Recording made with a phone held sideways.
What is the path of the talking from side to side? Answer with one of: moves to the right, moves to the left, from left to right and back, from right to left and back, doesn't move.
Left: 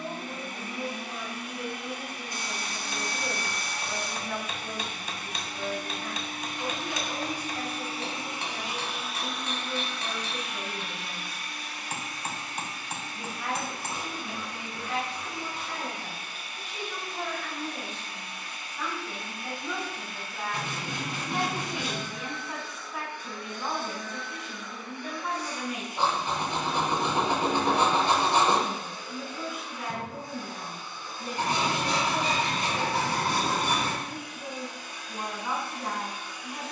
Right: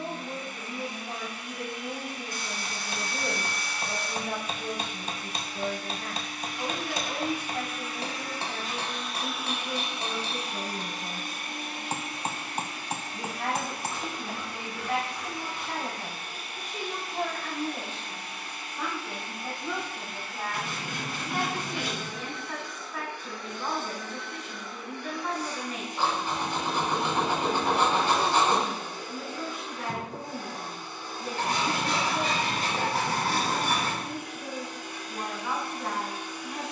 moves to the left.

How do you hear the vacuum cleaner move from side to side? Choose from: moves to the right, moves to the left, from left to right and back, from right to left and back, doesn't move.
moves to the right.